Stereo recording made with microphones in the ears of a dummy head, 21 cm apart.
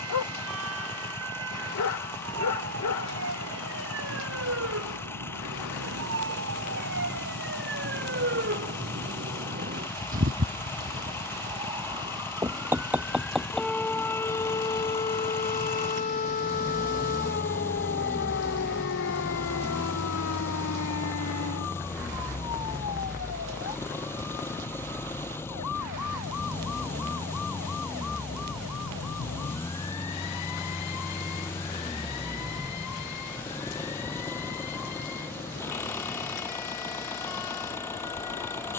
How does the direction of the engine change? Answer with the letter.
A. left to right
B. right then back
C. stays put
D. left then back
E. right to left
C.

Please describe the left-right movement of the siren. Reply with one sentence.
You can hear the siren move from right to left.